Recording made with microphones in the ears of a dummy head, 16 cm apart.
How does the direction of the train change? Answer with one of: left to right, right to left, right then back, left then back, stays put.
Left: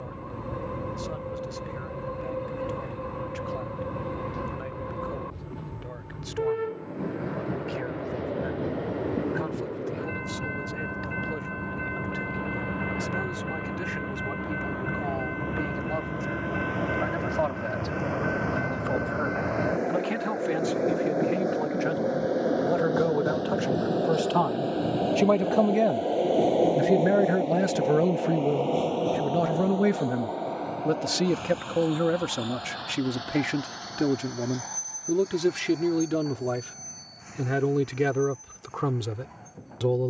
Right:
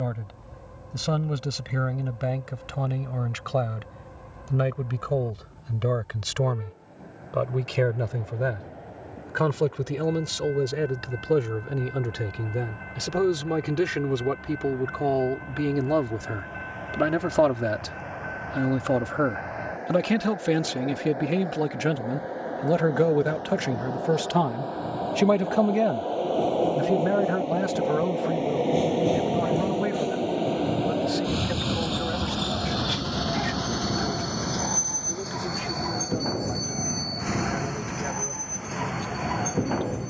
left to right.